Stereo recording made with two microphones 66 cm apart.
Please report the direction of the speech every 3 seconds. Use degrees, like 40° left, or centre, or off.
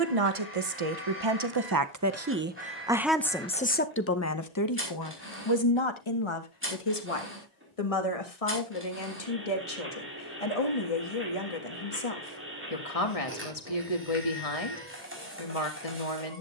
30° right, 20° left, 50° left, 60° left, 60° left, 60° left.